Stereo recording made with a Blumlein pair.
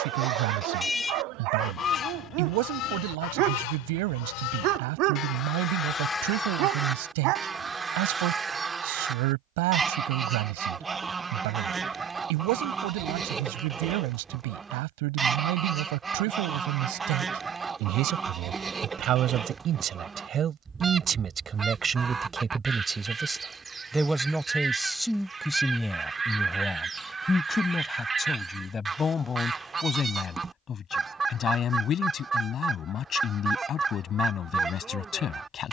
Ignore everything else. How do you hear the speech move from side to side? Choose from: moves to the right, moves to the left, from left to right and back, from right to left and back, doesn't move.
moves to the left.